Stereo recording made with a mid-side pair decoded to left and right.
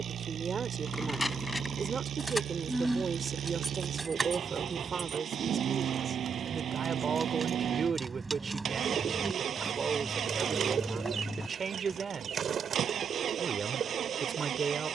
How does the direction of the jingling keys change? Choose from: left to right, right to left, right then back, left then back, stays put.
right then back.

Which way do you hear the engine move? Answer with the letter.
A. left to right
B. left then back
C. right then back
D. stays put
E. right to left
D.